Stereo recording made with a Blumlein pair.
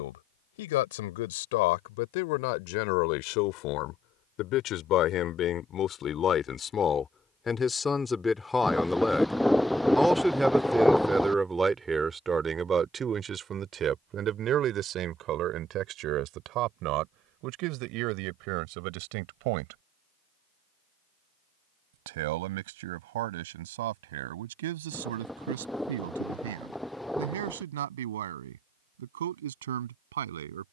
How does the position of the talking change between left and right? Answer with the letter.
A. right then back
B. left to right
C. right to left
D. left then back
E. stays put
B.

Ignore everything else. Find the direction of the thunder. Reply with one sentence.
In this clip you hear the thunder in the centre.